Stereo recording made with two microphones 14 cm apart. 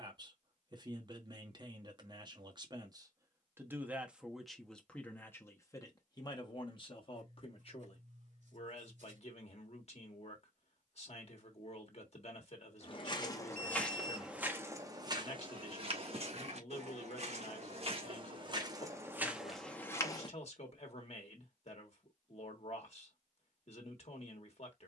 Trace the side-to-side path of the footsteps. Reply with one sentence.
In this clip you hear the footsteps move from left to right and back again.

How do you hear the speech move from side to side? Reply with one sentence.
You can hear the speech travel towards the left.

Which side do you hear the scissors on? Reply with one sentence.
You can hear the scissors on the right.